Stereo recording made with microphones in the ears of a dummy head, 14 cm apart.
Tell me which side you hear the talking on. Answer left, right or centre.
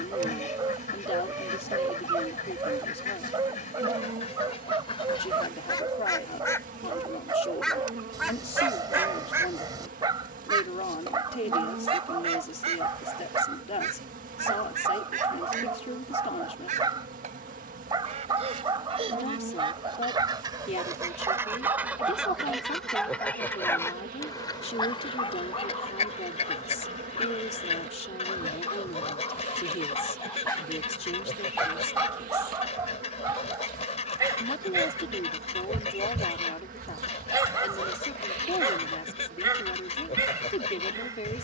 left.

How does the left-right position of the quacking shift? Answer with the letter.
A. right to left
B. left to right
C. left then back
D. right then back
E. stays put
D.